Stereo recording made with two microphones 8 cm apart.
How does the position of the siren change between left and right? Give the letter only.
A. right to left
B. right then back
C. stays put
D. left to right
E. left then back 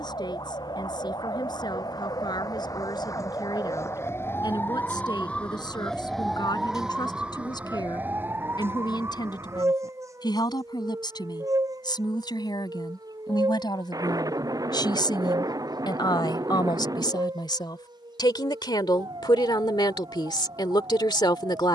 D.